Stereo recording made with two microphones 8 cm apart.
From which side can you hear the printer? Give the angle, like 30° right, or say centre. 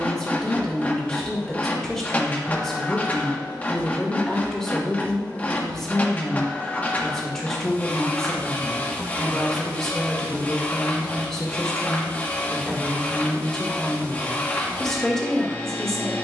20° left.